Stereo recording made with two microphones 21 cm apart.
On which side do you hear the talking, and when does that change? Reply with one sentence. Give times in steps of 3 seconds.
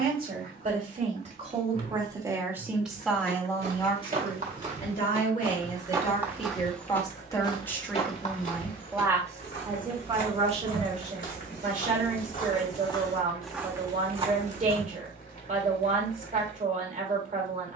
In this clip you hear the talking on the right from 0 s, on the left from 3 s, in the centre from 6 s and on the right from 9 s.